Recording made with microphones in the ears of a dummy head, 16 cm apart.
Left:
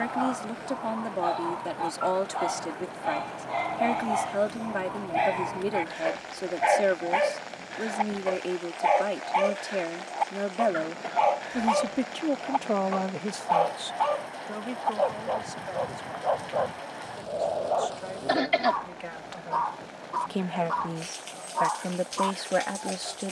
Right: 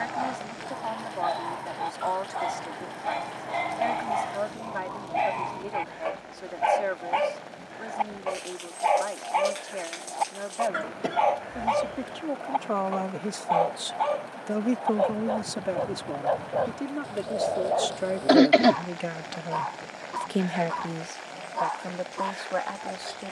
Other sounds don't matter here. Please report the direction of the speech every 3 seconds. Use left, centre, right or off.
left, left, left, left, centre, right, right, left.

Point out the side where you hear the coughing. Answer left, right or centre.
right.